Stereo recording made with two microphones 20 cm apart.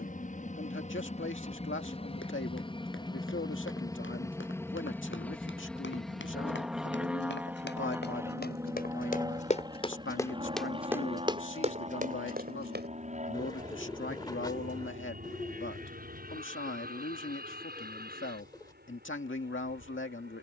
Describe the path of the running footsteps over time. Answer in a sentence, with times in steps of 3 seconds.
You can hear the running footsteps on the left from 0 s, in the centre from 9 s, on the right from 12 s and not at all from 15 s.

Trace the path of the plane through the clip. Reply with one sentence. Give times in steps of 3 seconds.
In this clip you hear the plane on the left from 0 s, in the centre from 3 s and on the right from 9 s.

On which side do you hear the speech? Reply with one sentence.
In this clip you hear the speech on the left.